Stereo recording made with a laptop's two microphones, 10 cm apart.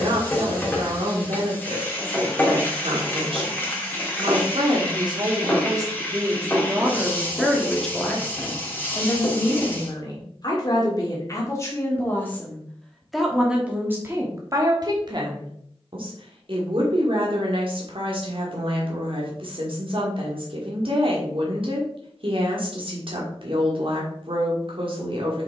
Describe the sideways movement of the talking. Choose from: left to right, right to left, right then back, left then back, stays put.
left then back.